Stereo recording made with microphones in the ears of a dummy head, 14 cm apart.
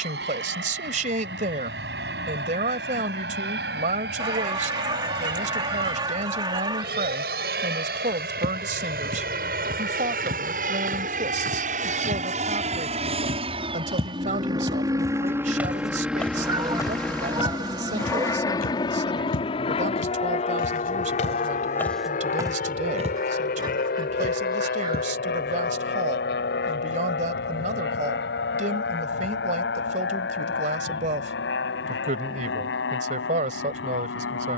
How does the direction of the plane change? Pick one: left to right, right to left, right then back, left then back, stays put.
right to left.